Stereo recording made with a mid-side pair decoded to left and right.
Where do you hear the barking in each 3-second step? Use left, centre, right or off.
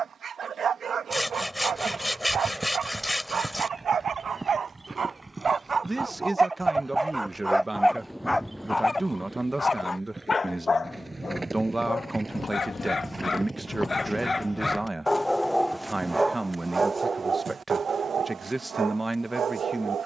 right, right, centre, left, left, right, right.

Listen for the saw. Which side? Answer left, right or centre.
centre.